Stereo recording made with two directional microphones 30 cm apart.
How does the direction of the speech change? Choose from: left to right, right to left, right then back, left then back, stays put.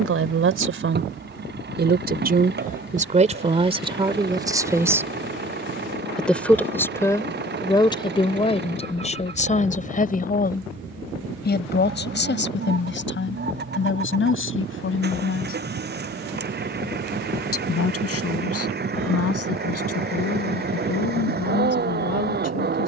right to left.